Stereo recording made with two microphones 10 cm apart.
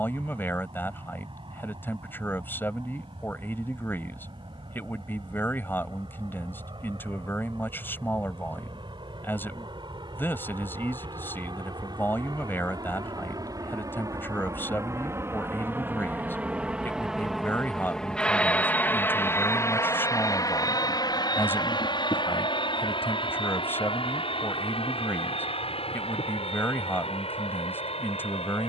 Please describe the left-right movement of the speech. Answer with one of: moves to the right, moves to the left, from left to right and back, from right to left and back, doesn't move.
doesn't move.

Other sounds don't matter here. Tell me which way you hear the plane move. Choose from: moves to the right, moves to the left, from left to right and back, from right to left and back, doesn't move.
moves to the left.